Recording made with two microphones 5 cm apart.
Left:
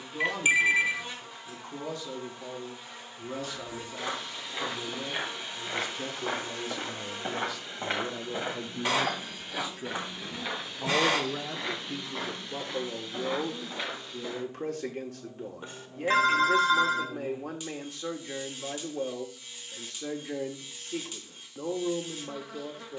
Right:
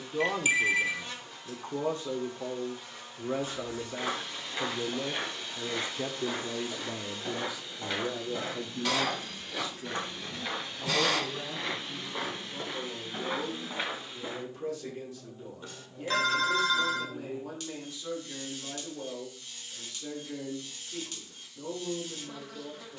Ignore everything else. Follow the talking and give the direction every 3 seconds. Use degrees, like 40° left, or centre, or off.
30° right, 30° right, 10° right, 30° left, 60° left, 60° left, 60° left, 60° left.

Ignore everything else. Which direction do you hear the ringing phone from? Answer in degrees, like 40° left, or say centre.
20° left.